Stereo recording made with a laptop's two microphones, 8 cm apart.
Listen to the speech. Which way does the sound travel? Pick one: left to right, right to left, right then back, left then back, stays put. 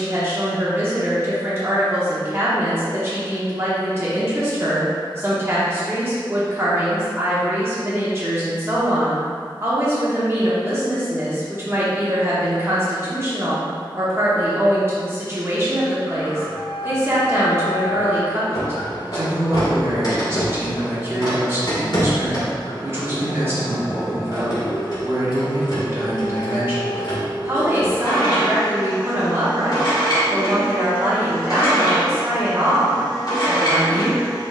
stays put.